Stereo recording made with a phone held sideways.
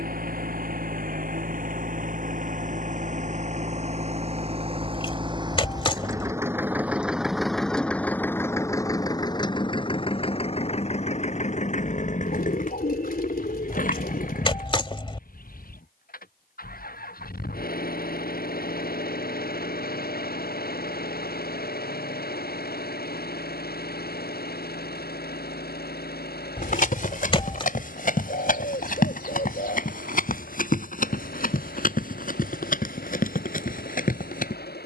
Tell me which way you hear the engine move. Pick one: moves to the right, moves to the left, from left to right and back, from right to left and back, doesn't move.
moves to the left.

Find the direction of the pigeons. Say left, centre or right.
left.